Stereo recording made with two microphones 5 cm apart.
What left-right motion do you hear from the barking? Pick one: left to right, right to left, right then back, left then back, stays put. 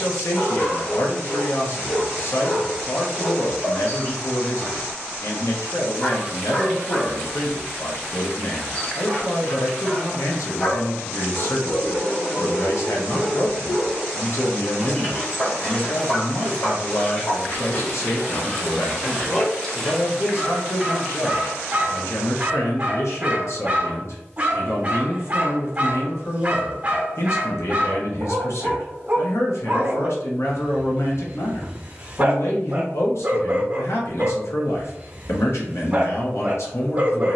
left to right.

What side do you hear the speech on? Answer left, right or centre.
left.